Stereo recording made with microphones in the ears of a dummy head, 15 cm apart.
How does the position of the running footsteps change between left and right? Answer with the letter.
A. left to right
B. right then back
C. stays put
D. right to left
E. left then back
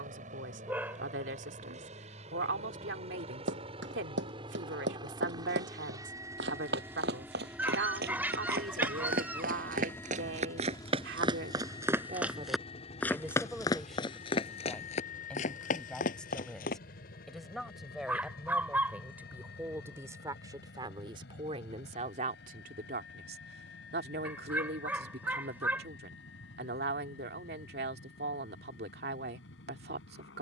D.